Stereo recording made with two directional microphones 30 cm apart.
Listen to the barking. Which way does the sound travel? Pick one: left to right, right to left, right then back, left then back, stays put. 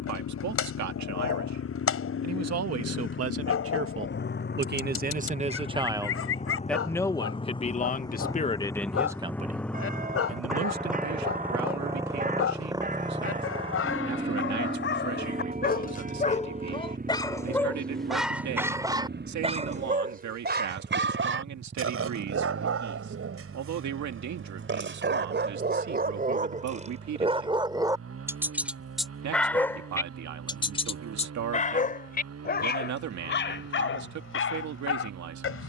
right then back.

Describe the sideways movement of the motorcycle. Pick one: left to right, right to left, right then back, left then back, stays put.
left to right.